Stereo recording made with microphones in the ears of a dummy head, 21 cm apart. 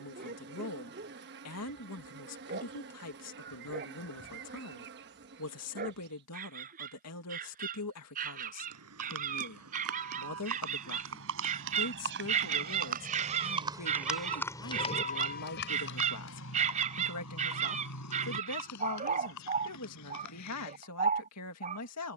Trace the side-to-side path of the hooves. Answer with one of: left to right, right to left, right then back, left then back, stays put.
right to left.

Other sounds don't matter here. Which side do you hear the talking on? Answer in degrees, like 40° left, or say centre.
70° left.